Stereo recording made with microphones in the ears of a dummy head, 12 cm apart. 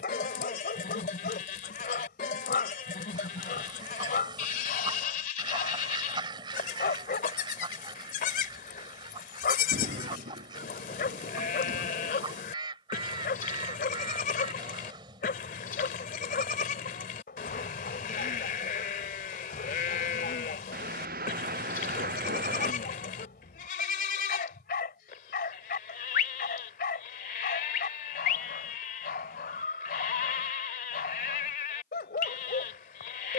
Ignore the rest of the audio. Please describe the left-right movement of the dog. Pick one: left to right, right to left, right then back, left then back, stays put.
stays put.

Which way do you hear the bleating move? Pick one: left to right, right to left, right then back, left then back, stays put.
stays put.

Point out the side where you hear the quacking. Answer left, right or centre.
right.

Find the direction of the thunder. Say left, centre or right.
right.